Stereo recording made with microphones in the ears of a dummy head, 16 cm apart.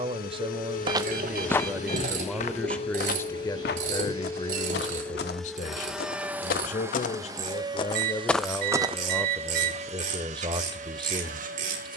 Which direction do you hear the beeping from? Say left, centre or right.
right.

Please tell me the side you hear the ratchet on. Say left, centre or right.
right.